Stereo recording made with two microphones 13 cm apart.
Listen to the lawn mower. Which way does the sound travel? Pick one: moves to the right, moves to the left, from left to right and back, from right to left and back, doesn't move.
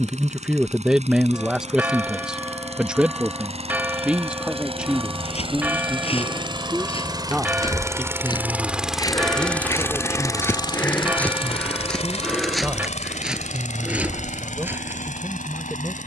moves to the left.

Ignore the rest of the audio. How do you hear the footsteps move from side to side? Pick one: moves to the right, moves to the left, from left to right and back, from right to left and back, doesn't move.
moves to the right.